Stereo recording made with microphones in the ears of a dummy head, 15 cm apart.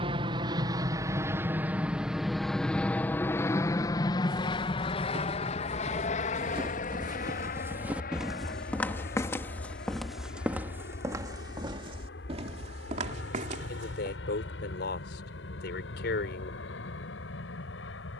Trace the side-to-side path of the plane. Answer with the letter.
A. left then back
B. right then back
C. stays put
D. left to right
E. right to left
E.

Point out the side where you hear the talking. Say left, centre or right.
left.